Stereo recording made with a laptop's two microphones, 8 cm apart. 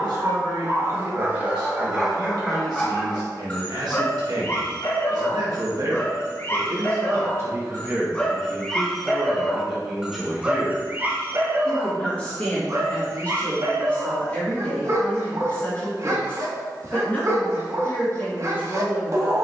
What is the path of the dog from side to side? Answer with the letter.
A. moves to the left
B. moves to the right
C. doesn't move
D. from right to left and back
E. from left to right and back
D.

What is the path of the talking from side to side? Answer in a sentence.
You can hear the talking travel towards the left.